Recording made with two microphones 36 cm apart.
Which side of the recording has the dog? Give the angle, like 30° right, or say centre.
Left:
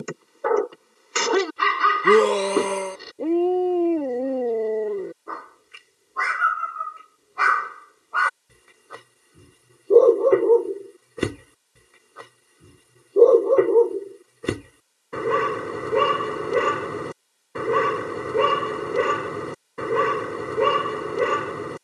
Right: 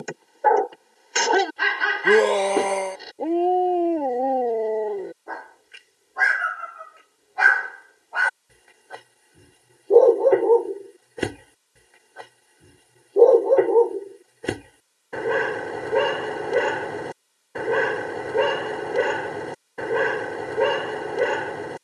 10° left.